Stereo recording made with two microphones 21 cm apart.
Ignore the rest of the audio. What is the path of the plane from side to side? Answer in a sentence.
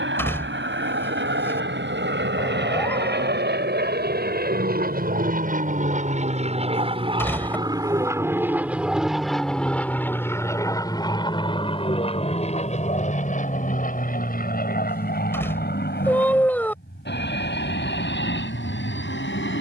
In this clip you hear the plane go from the right side to the left.